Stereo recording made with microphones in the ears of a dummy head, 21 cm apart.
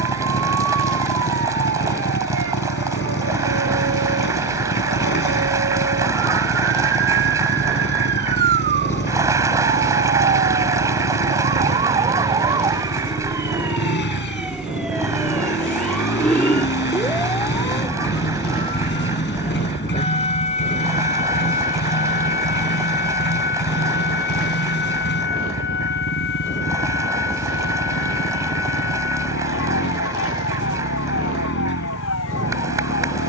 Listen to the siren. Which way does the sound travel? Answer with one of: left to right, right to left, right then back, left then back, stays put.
right to left.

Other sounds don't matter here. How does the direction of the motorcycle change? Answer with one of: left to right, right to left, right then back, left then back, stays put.
stays put.